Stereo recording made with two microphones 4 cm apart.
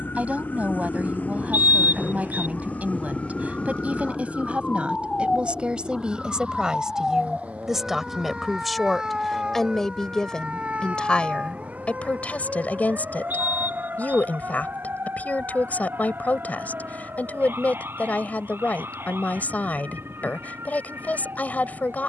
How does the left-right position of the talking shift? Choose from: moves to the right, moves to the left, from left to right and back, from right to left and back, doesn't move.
moves to the left.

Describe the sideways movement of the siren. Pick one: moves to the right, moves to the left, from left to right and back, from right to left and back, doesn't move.
moves to the right.